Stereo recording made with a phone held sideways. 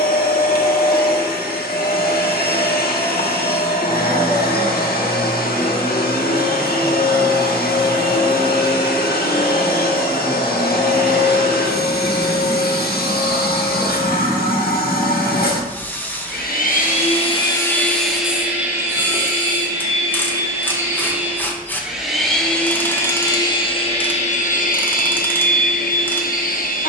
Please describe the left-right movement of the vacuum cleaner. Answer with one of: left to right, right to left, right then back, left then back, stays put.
right then back.